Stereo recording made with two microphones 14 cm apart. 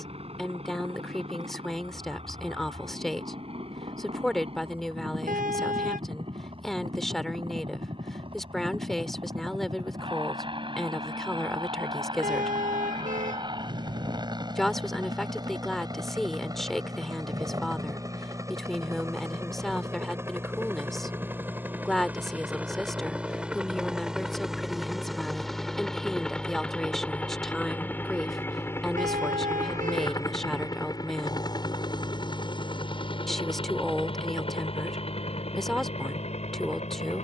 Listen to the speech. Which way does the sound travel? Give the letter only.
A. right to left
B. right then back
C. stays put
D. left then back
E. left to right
C.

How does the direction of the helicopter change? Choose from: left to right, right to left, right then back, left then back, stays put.
right to left.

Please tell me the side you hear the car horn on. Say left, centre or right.
right.